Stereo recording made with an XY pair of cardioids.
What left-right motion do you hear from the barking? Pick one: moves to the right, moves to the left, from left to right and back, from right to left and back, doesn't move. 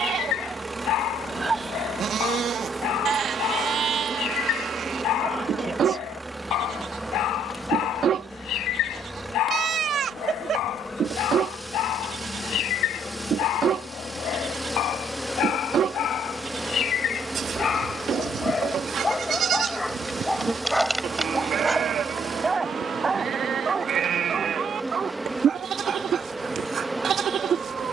moves to the right.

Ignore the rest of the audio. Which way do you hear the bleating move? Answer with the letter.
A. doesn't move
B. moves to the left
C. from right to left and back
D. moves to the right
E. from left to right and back
A.